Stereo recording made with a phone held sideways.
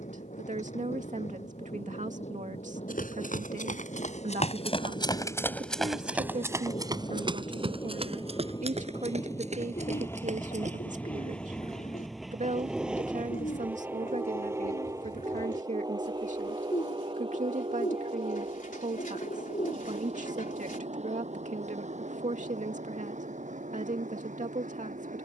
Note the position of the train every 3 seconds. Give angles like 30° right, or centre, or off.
60° left, 50° left, 30° left, 10° left, 10° right, 30° right, 50° right, 60° right, 60° right.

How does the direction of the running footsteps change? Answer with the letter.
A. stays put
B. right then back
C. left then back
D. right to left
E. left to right
E.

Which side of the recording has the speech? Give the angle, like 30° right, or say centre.
60° right.